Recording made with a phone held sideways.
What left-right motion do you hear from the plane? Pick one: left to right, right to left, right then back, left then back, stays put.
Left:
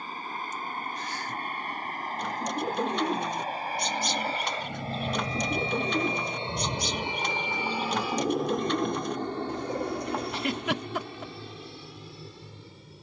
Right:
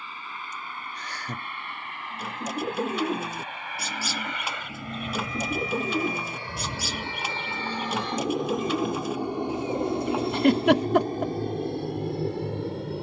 left to right.